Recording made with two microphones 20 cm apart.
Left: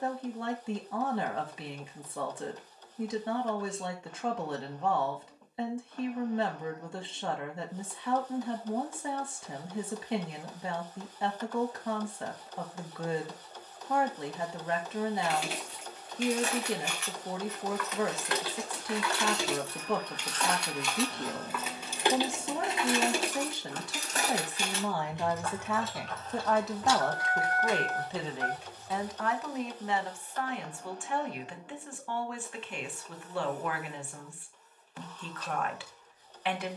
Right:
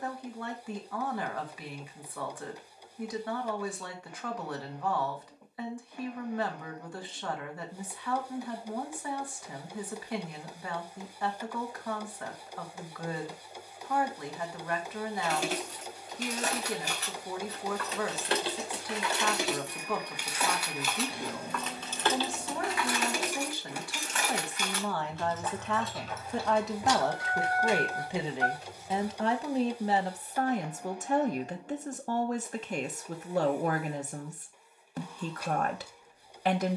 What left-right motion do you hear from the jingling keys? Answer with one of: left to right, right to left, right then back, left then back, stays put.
left then back.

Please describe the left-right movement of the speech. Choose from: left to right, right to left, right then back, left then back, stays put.
left to right.